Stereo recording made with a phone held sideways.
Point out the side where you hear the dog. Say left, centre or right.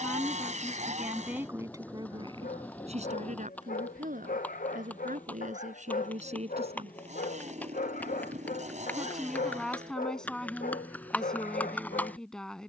left.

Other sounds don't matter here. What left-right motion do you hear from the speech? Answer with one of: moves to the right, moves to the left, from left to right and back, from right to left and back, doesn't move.
from left to right and back.